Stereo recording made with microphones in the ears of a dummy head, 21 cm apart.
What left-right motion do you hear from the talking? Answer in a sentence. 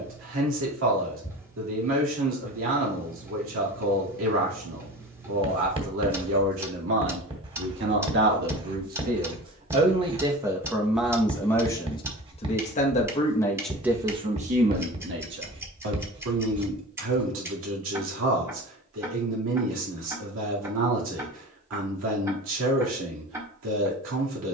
You can hear the talking move from right to left and back again.